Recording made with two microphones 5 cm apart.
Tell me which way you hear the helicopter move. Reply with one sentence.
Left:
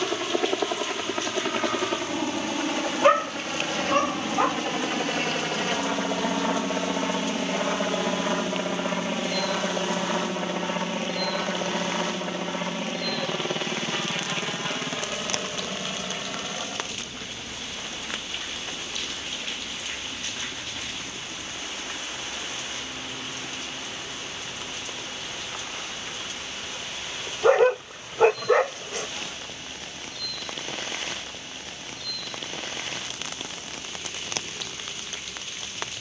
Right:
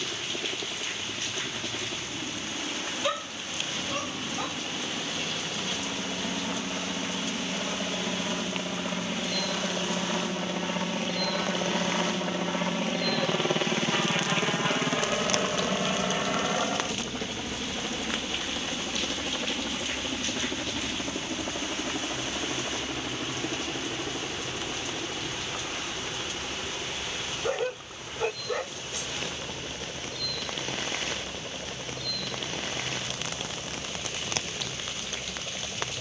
You can hear the helicopter go from the left side to the right.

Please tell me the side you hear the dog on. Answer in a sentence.
In this clip you hear the dog on the left.